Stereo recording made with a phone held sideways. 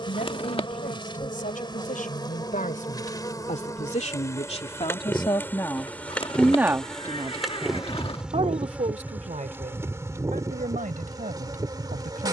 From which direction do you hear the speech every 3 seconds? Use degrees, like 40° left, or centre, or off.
70° left, 40° left, 40° right, 70° right.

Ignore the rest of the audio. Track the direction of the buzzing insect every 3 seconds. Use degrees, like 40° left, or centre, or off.
30° left, 20° left, centre, 20° right.